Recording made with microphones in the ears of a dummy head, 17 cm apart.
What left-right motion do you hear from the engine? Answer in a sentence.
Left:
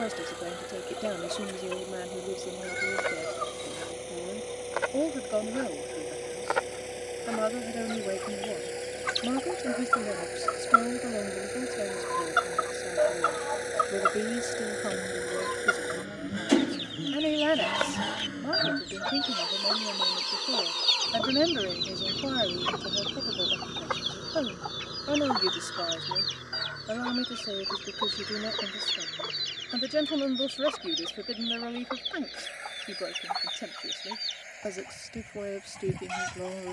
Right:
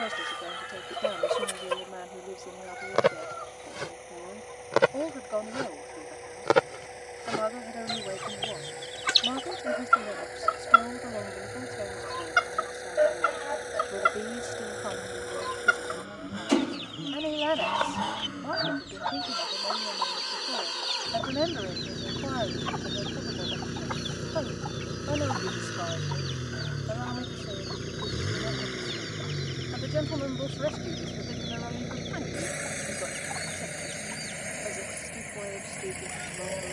You can hear the engine move from left to right.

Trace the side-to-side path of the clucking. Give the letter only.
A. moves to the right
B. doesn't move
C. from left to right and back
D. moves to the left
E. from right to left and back
D.